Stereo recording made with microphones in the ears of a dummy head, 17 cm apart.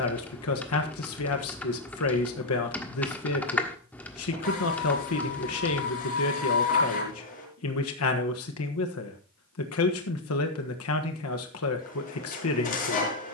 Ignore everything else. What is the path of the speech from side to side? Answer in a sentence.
You can hear the speech stay put.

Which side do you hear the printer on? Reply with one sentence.
You can hear the printer on the left.